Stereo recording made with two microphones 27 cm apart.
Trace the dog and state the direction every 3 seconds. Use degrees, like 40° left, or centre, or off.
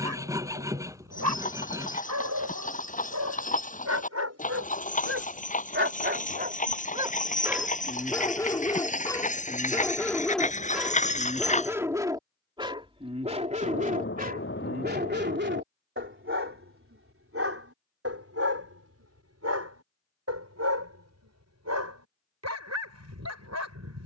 70° right, 60° right, 10° right, centre, 30° right, 50° right, 60° right, 70° right.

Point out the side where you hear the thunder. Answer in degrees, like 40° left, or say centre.
50° left.